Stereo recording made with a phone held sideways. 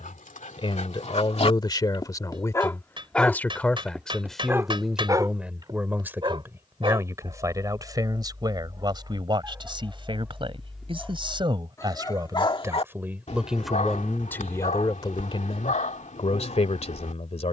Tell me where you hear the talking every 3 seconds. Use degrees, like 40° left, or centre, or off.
30° left, centre, 20° right, 30° right, centre, 40° left.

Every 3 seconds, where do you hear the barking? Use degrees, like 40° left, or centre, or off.
50° left, 10° right, 30° right, centre, 50° left, 60° left.